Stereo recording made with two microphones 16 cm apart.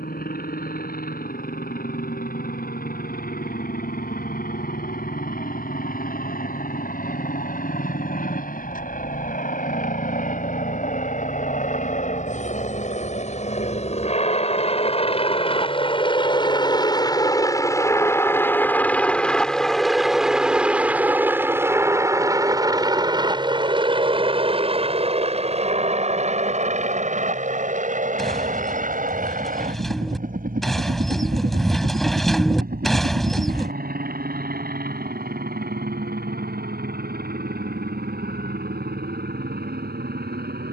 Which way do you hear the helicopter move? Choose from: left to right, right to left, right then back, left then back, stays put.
left to right.